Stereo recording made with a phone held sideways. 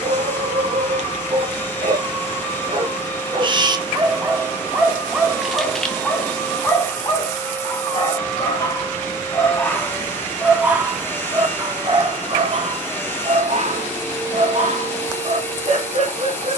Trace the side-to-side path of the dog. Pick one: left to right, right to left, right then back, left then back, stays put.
left then back.